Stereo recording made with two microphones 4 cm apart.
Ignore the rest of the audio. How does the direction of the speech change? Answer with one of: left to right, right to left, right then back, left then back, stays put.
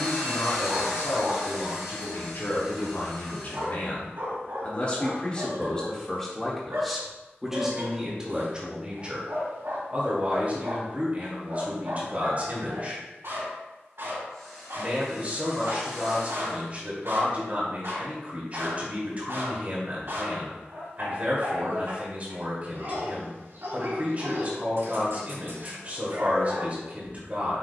left to right.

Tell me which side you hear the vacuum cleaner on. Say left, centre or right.
centre.